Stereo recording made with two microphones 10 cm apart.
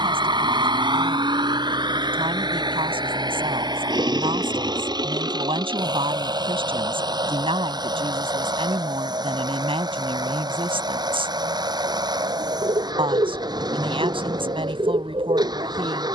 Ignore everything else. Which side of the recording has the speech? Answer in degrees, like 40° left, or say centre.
60° right.